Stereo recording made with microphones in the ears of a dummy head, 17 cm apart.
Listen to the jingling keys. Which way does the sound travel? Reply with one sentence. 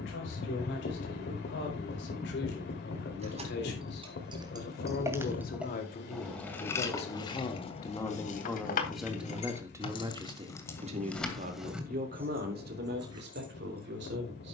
You can hear the jingling keys move from right to left and back again.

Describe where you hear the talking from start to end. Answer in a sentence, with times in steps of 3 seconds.
In this clip you hear the talking on the left from 0 s and on the right from 9 s.